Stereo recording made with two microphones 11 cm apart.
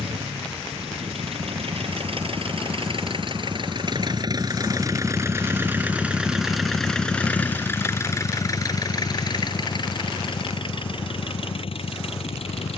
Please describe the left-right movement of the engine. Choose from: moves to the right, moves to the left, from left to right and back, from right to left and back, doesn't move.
moves to the left.